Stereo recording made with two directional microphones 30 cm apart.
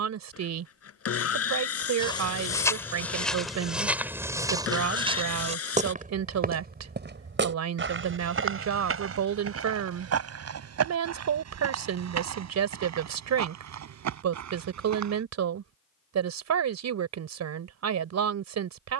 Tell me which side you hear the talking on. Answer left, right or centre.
right.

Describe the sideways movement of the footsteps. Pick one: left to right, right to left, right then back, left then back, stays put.
left to right.